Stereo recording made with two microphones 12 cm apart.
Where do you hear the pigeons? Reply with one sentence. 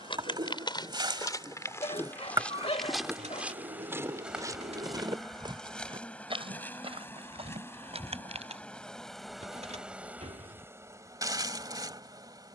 You can hear the pigeons on the right.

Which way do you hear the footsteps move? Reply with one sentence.
In this clip you hear the footsteps move to the right.